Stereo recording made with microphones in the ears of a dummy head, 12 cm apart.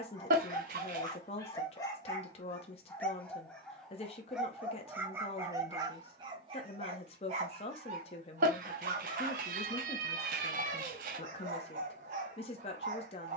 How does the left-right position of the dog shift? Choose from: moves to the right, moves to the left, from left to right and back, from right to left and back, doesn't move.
moves to the right.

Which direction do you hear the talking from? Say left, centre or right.
left.